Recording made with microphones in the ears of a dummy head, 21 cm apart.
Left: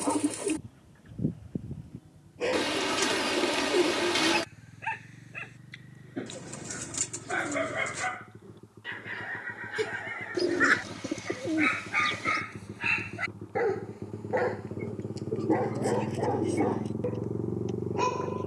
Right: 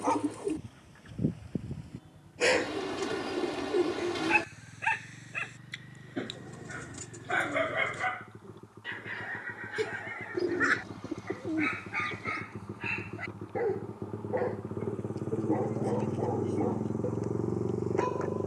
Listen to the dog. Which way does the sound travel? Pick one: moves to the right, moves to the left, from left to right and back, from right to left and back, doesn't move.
moves to the left.